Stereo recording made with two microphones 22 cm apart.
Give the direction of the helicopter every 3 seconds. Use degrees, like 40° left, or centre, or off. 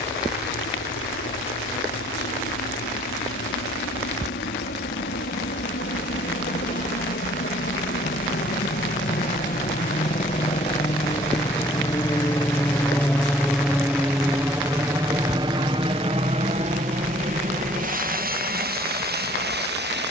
70° left, 60° left, 50° left, 30° left, centre, 30° right, 50° right.